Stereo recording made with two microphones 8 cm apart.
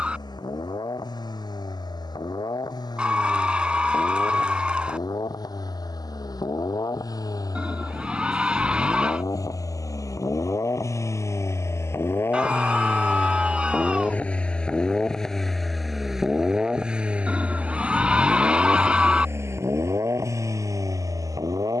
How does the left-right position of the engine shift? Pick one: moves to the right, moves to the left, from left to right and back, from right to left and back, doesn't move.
moves to the right.